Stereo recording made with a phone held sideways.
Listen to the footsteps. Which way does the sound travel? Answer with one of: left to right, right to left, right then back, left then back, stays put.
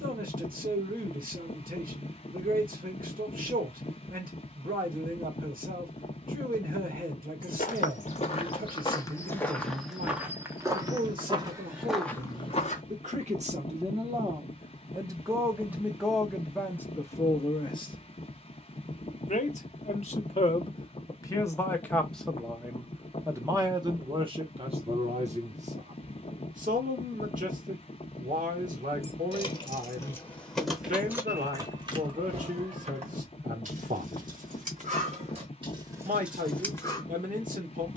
right then back.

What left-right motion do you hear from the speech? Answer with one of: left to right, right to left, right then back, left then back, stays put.
left then back.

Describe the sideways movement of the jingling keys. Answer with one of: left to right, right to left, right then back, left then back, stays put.
right then back.